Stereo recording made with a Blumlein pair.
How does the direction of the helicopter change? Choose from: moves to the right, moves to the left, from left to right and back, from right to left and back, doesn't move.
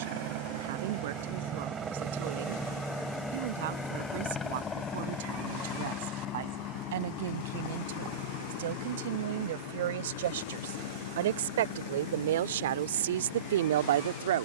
moves to the left.